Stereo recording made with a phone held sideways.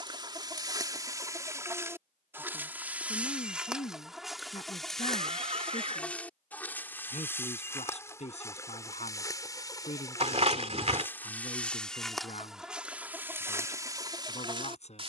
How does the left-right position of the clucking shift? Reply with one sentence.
You can hear the clucking go left and come back.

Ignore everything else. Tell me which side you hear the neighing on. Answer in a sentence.
You can hear the neighing on the right.